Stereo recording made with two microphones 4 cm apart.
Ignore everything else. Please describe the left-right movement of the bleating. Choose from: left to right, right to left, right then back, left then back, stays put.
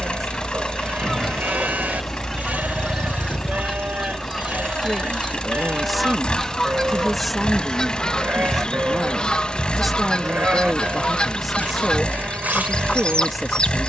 stays put.